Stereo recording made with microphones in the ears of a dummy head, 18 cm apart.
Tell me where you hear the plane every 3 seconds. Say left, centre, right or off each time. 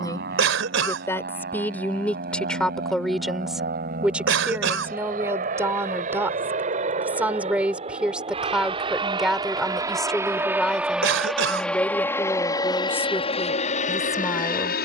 right, right, right, centre, left.